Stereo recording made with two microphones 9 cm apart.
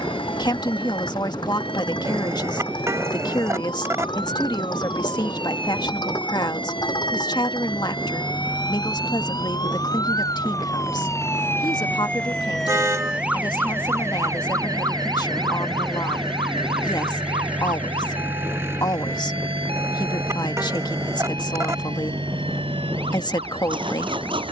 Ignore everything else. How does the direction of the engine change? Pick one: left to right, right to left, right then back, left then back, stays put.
left to right.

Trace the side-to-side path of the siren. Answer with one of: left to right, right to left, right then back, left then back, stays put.
left to right.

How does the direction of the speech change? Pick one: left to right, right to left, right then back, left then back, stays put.
stays put.